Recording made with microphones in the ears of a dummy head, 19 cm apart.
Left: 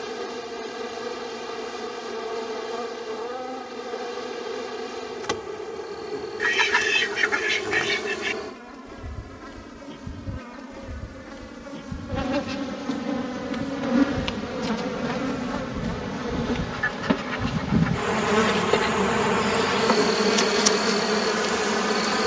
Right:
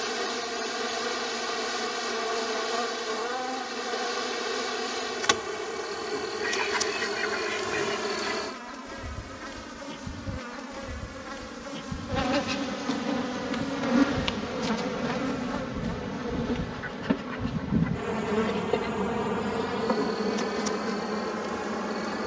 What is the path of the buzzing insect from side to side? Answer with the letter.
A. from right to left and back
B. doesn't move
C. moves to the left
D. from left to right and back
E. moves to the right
C.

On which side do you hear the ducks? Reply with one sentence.
In this clip you hear the ducks on the left.